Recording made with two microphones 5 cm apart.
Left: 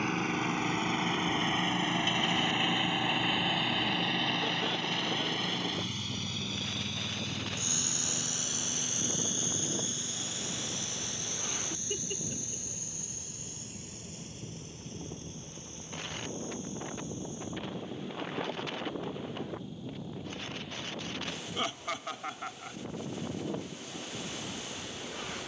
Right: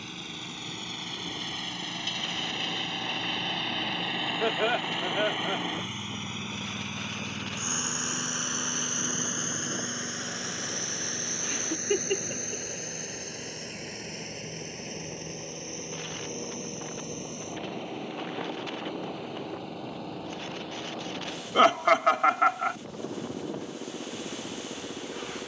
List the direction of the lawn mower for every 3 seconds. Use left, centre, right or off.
left, centre, right, right, right, right, right, right, right.